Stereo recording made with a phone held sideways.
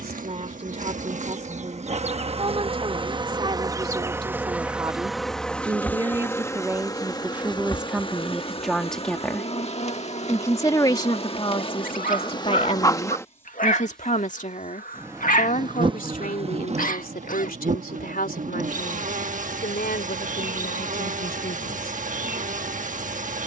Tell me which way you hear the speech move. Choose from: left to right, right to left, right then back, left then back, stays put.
right to left.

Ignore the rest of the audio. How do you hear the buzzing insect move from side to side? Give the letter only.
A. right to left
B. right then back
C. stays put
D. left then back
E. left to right
D.